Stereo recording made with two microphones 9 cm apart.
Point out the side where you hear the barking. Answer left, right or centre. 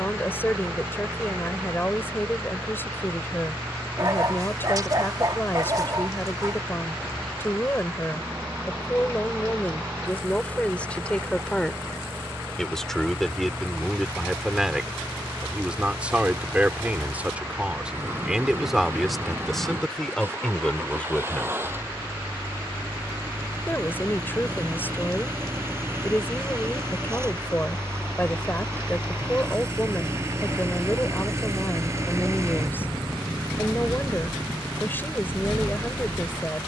right.